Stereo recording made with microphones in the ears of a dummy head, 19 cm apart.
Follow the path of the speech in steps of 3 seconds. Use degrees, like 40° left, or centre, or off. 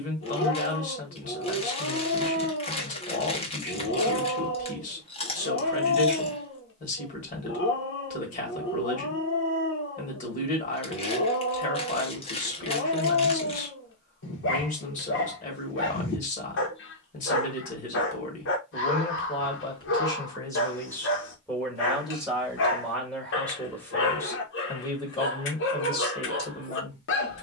40° left, 40° left, 40° left, 40° left, 40° left, 40° left, 20° left, centre, 20° left.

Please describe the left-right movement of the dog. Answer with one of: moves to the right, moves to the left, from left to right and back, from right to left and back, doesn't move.
doesn't move.